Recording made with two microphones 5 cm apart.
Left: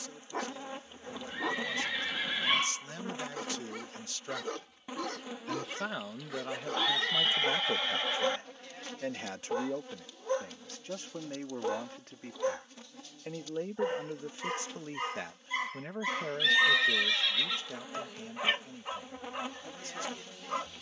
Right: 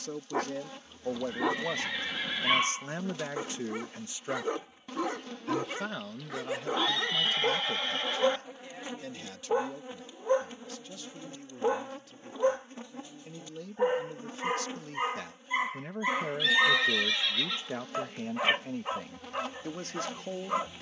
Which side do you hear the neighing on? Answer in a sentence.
You can hear the neighing in the centre.